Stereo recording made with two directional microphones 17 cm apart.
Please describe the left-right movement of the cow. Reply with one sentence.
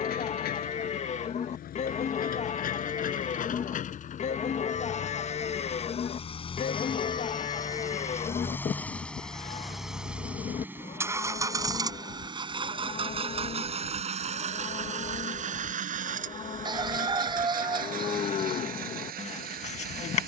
You can hear the cow stay put.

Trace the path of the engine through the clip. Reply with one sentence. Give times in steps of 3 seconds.
You can hear the engine on the left from 0 s, in the centre from 9 s and on the right from 12 s.